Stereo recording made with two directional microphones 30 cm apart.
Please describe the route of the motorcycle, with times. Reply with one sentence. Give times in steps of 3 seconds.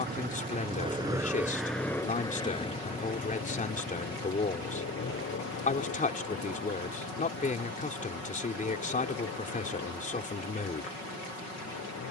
In this clip you hear the motorcycle in the centre from 0 s and on the left from 3 s.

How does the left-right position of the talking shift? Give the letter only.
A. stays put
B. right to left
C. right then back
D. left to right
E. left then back
A.